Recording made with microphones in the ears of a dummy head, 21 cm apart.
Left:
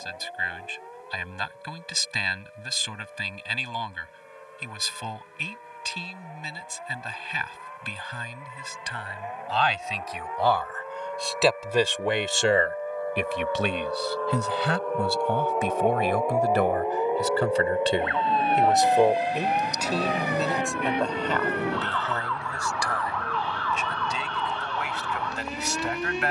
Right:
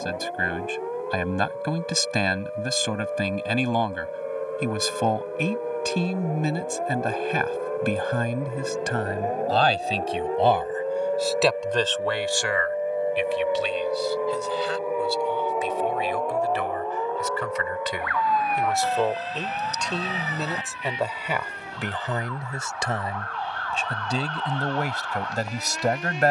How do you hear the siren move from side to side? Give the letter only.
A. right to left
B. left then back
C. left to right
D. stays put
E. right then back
A.